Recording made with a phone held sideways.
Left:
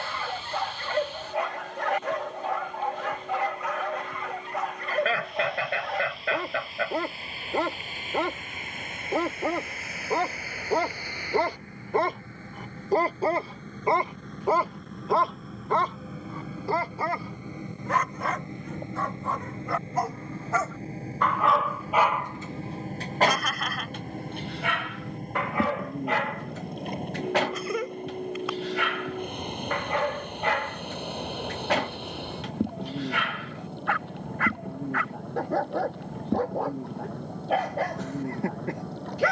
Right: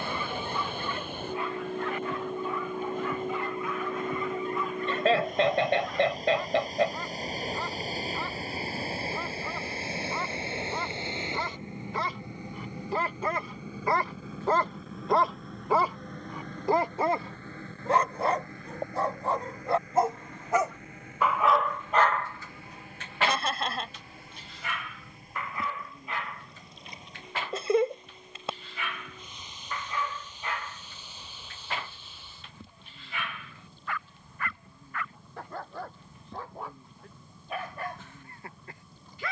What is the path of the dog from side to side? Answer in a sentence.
In this clip you hear the dog go right and come back.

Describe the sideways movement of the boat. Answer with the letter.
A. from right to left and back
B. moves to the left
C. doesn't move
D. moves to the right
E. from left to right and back
B.